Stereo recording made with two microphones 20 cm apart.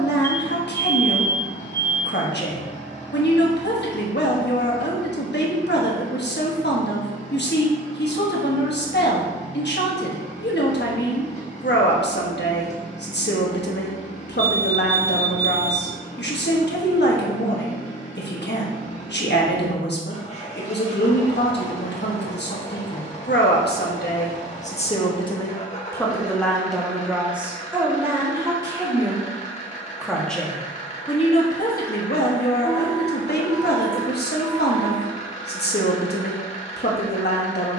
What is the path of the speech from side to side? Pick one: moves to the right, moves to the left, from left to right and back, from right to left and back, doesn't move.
from left to right and back.